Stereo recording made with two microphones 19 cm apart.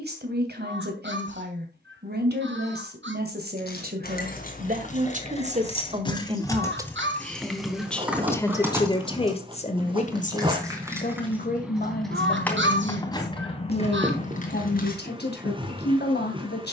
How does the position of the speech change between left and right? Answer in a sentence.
In this clip you hear the speech go from the right side to the left.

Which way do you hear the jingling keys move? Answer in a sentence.
In this clip you hear the jingling keys go right and come back.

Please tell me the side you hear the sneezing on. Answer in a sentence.
You can hear the sneezing on the right.